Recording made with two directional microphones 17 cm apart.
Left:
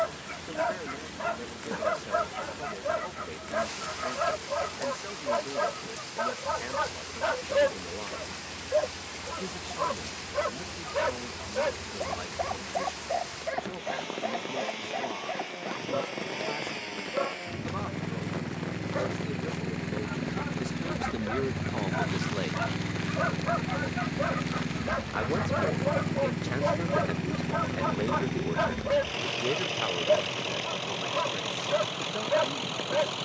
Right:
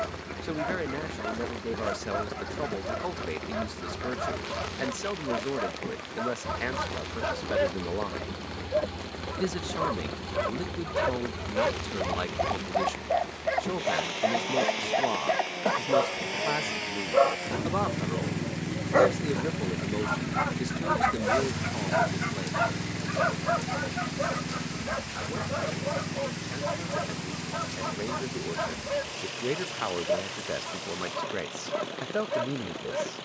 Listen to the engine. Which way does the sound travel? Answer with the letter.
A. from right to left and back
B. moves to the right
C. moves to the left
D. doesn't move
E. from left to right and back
C.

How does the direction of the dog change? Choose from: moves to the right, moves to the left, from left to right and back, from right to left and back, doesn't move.
from left to right and back.